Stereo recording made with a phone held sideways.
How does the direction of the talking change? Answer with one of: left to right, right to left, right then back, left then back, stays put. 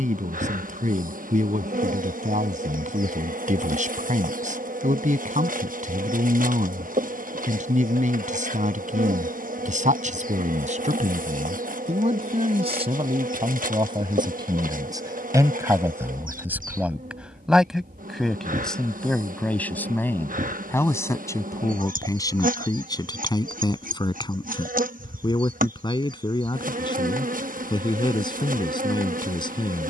right to left.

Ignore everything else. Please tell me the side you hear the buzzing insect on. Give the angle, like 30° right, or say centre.
70° right.